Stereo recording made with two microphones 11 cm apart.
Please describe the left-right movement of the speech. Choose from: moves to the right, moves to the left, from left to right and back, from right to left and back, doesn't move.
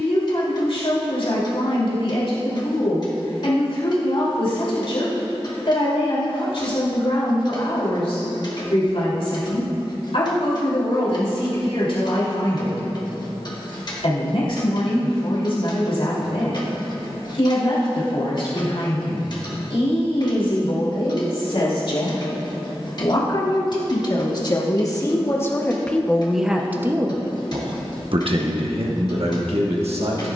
moves to the right.